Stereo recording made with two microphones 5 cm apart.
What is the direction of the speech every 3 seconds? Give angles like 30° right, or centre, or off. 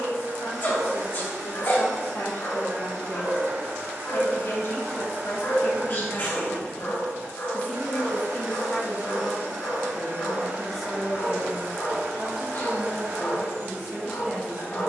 70° left, 60° left, 30° left, centre, 20° right.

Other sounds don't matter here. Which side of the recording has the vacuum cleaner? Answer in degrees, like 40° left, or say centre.
60° right.